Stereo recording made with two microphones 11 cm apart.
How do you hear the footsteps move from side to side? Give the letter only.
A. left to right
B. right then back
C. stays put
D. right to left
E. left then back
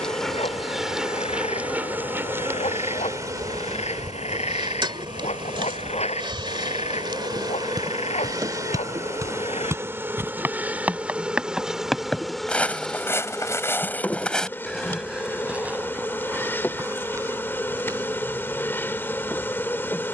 E.